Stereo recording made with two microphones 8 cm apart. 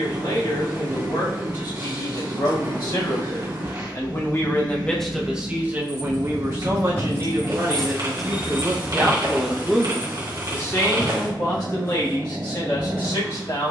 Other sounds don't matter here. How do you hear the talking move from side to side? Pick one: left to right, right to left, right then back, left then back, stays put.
right then back.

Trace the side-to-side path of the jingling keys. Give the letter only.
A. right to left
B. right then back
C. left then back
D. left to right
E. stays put
D.